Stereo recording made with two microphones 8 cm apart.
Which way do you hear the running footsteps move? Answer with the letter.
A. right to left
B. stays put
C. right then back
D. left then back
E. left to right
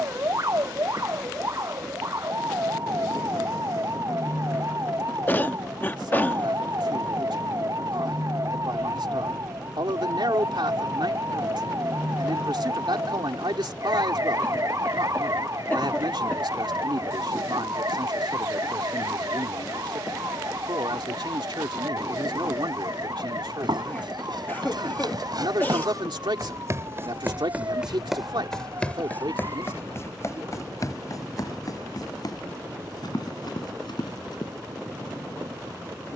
A.